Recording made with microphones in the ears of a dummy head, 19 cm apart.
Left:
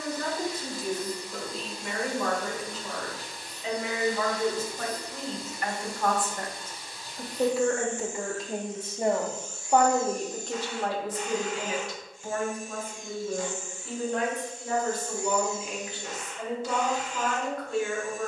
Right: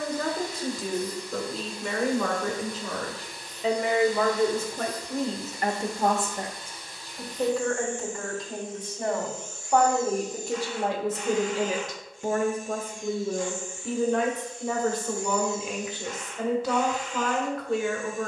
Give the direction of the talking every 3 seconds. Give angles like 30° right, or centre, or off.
70° right, 50° right, 10° left, 10° right, 60° right, 60° right.